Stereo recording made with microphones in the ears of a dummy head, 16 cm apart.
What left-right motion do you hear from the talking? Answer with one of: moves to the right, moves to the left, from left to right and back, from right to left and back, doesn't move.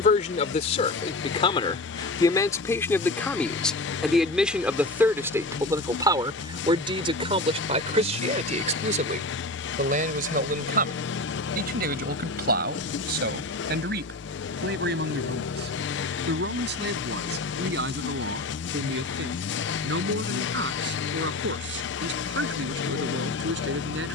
moves to the right.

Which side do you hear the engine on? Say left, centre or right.
left.